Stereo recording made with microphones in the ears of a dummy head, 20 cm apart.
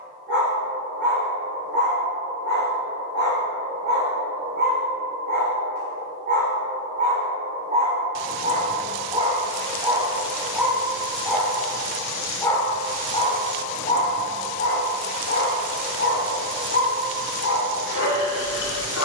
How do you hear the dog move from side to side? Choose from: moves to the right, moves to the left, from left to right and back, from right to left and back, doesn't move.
moves to the left.